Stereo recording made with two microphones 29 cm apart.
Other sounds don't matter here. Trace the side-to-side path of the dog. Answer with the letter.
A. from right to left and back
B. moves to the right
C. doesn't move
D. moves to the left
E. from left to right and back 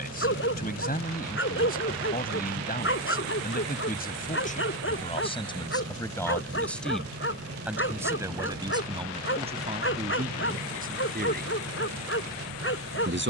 C.